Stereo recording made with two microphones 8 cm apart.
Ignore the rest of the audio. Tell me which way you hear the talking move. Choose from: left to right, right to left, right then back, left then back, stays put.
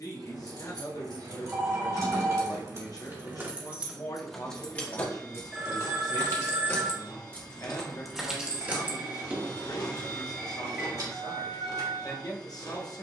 stays put.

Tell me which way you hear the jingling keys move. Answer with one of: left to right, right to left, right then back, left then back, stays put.
left then back.